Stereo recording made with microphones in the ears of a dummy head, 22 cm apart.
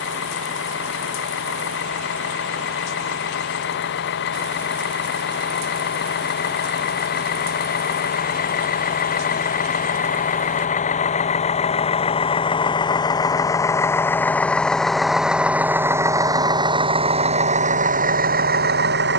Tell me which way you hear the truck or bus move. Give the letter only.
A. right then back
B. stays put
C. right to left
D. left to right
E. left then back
D.